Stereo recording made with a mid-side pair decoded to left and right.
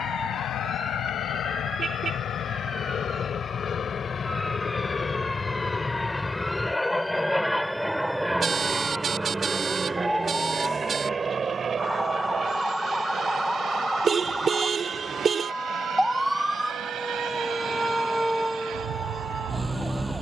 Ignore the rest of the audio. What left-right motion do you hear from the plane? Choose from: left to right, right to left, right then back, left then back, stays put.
left to right.